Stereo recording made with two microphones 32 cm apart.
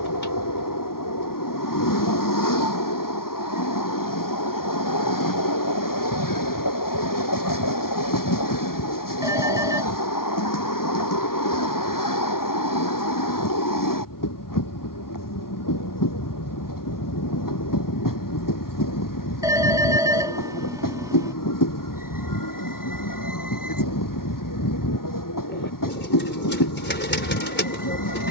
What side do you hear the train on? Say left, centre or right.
left.